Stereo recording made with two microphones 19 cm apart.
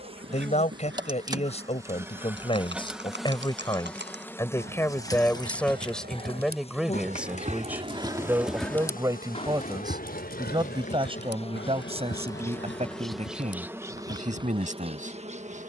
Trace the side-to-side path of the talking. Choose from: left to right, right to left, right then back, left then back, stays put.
left to right.